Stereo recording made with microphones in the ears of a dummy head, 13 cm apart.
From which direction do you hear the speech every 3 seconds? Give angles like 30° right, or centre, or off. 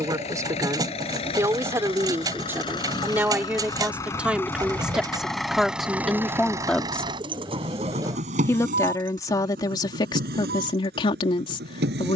20° right, 10° right, 10° left, 30° left.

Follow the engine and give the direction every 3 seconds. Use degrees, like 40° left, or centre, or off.
40° left, 10° left, 40° right, 70° right.